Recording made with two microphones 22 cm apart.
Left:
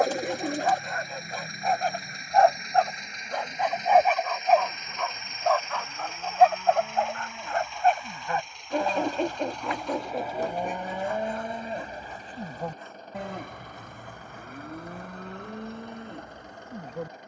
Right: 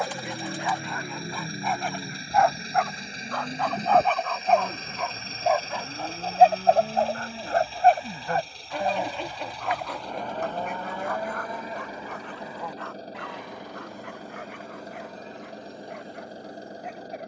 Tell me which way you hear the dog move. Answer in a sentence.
In this clip you hear the dog go from the left side to the right.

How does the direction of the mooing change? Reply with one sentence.
In this clip you hear the mooing move from right to left.